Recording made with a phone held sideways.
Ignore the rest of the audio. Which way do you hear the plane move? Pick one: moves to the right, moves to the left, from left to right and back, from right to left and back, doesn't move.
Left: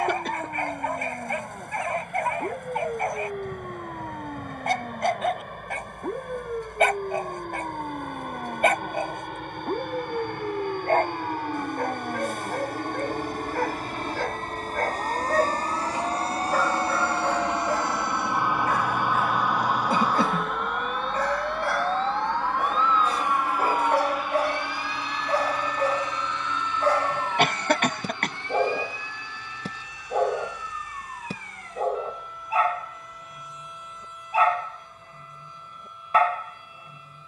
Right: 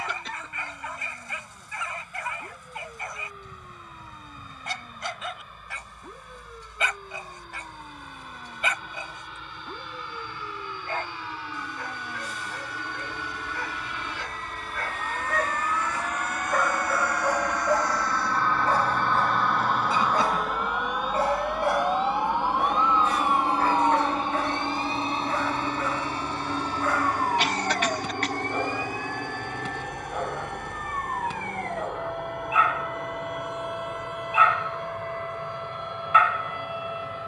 moves to the right.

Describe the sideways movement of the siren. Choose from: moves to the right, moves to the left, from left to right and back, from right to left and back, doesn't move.
moves to the right.